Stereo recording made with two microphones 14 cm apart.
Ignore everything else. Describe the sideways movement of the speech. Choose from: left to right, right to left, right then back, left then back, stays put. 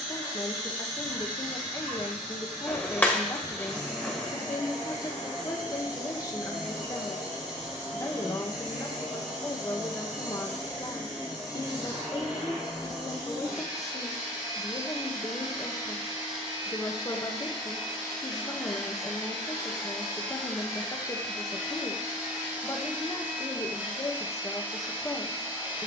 stays put.